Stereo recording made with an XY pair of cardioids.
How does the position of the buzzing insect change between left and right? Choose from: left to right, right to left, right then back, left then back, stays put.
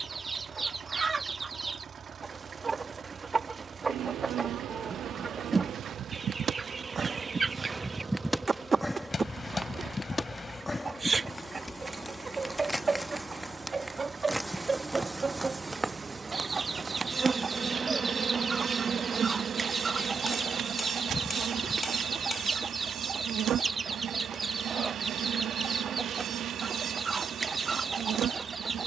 left then back.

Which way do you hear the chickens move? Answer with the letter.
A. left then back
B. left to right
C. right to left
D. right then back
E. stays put
E.